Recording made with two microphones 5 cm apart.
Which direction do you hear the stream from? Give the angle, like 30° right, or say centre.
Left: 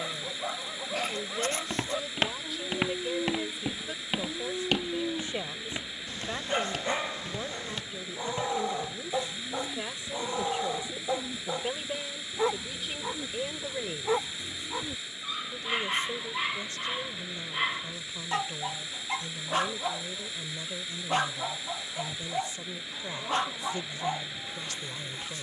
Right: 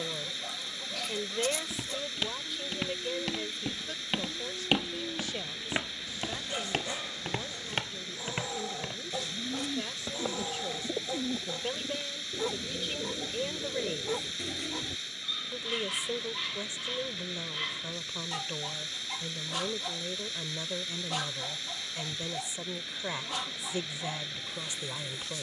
10° left.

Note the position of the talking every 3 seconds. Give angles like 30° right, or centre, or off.
10° right, 20° left, 30° left, 20° left, centre, 20° right, 20° right, 20° right, 20° right.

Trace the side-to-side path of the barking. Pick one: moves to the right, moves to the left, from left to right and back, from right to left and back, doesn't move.
doesn't move.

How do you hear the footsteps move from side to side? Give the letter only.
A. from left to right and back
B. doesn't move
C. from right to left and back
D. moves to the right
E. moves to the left
D.